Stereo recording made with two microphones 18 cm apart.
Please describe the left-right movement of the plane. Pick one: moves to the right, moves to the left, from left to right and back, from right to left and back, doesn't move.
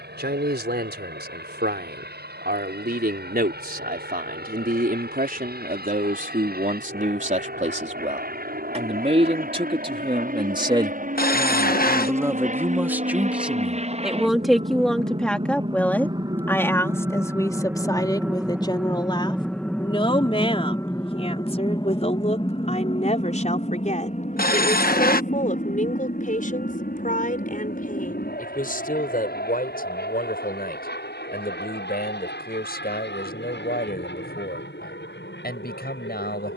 moves to the left.